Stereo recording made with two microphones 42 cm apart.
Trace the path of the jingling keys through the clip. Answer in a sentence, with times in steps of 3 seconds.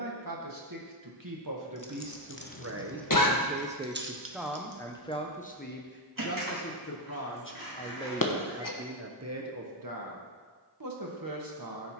You can hear the jingling keys on the left from 0 s, on the right from 3 s and not at all from 9 s.